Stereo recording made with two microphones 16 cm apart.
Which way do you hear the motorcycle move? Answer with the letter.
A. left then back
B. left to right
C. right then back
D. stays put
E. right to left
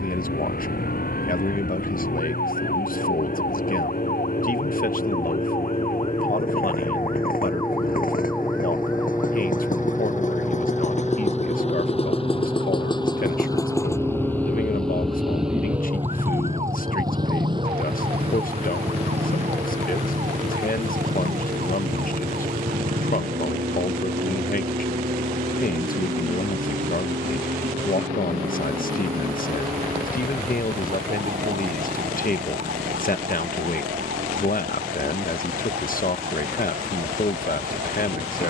B.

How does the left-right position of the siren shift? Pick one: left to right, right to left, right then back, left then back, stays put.
left to right.